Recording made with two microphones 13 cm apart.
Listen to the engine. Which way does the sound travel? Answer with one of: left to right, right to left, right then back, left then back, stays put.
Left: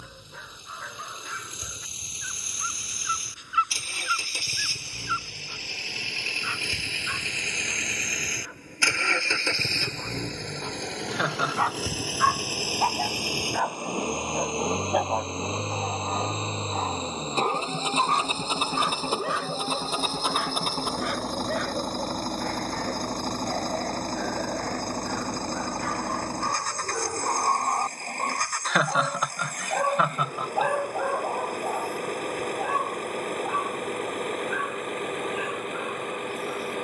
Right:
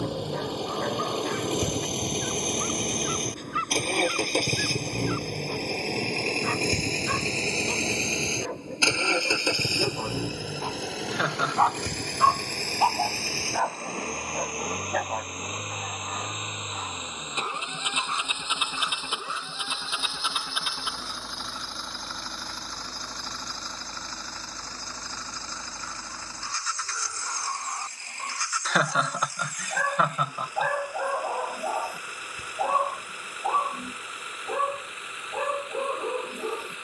right to left.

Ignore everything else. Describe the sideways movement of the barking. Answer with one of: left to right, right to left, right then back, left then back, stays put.
left then back.